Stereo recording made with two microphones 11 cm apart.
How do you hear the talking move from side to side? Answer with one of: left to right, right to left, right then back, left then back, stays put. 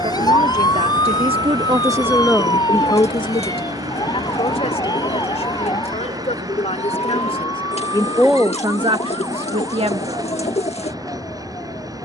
left then back.